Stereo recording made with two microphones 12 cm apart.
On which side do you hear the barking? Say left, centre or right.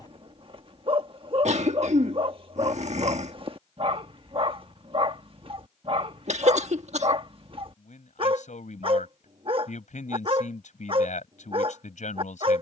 right.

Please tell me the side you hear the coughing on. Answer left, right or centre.
right.